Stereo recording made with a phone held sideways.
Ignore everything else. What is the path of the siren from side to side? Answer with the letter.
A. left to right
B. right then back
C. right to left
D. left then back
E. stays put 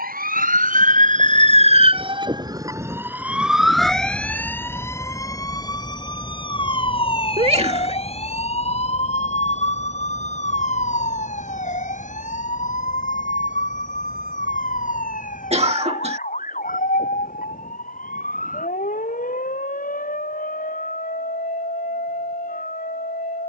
C.